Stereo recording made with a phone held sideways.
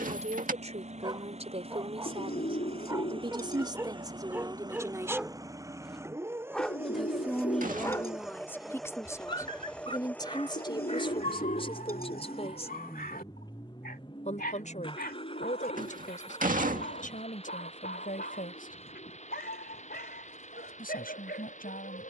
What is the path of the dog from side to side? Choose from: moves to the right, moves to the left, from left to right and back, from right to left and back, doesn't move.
moves to the left.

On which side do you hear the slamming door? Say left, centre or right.
right.